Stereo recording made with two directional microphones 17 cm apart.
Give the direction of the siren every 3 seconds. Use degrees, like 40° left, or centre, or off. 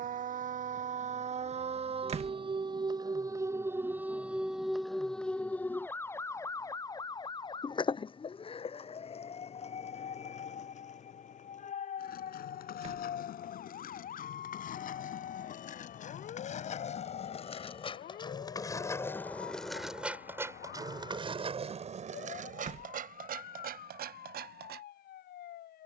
40° right, centre, 30° left, 40° left, 50° left, 50° left, 60° left, 60° left, 60° left.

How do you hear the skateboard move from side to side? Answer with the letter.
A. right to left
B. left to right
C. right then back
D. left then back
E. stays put
B.